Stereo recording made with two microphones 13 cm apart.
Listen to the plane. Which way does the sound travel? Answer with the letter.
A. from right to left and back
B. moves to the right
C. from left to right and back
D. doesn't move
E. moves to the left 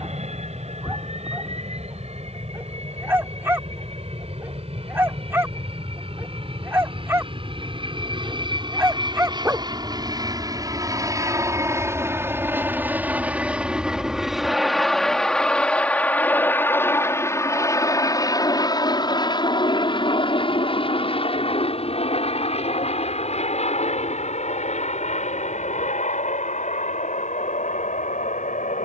E.